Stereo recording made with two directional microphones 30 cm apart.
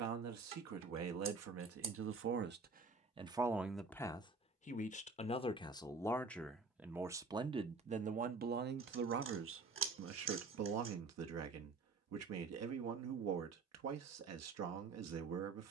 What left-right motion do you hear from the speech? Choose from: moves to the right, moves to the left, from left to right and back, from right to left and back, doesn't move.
from right to left and back.